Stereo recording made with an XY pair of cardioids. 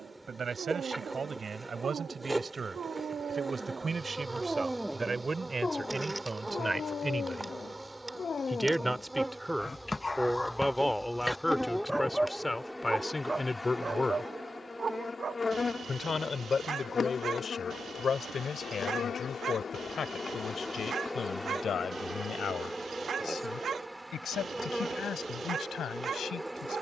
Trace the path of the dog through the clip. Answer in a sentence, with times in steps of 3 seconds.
In this clip you hear the dog on the right from 0 s, on the left from 6 s, in the centre from 9 s and on the right from 12 s.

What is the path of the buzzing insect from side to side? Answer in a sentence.
In this clip you hear the buzzing insect move from right to left and back again.